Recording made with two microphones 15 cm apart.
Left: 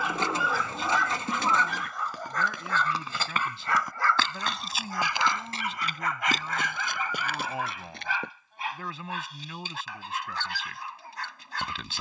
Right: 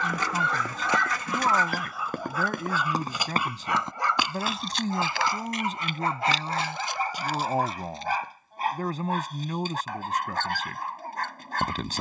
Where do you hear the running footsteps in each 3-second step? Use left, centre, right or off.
right, centre, left, off.